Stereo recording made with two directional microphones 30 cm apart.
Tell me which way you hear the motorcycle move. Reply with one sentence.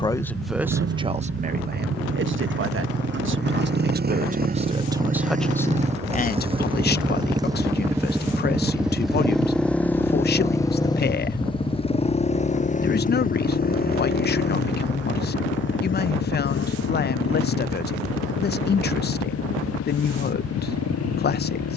You can hear the motorcycle move from right to left.